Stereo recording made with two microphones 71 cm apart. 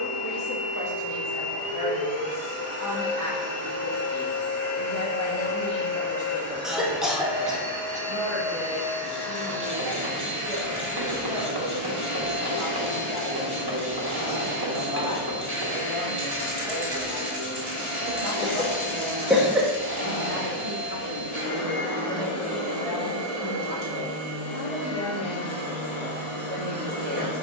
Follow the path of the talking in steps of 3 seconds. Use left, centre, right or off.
left, left, centre, right, right, right, right, right, right.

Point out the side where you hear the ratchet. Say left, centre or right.
right.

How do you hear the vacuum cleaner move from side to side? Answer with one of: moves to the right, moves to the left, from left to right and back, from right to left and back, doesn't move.
doesn't move.